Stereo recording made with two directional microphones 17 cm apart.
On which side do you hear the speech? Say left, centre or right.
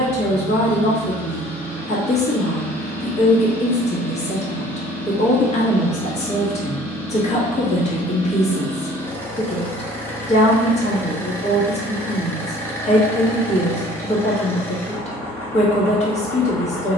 left.